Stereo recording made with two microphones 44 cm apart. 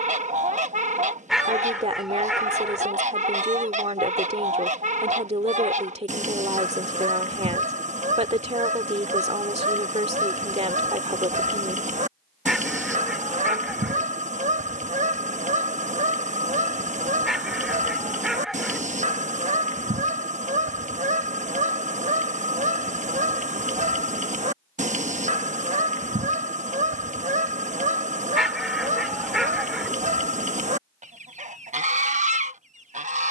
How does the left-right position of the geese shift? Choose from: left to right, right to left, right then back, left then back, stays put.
stays put.